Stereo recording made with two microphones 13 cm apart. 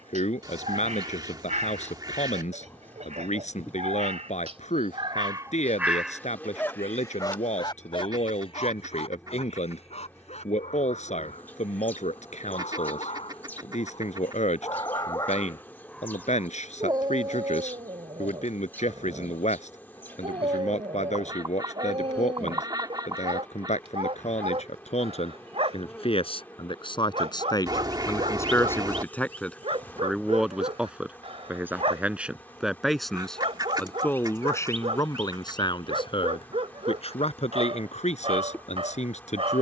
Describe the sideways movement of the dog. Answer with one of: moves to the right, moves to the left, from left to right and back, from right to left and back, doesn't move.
from right to left and back.